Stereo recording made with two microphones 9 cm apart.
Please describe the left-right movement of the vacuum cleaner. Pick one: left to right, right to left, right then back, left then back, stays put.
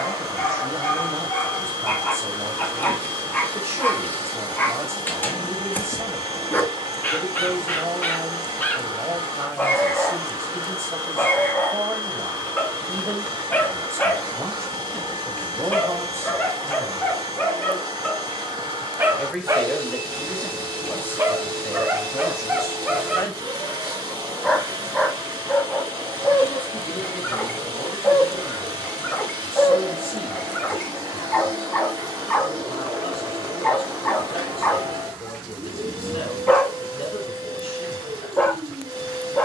stays put.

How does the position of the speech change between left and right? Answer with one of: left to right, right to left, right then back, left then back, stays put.
right to left.